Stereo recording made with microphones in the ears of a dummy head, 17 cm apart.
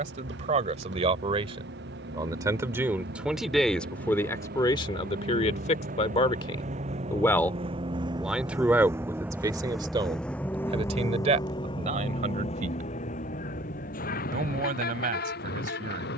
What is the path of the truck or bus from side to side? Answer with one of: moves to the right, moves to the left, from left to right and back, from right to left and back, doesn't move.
moves to the left.